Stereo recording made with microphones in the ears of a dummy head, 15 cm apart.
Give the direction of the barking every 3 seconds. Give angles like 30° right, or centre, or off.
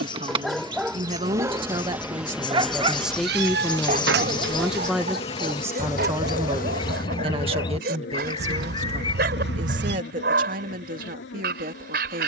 10° right, 50° right, 60° right, 60° right.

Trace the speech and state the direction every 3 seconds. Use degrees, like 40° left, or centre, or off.
30° right, centre, 30° right, 50° right.